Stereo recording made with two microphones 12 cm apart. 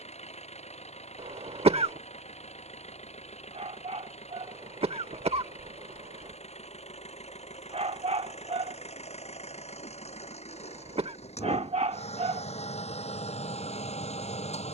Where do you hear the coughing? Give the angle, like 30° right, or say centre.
50° right.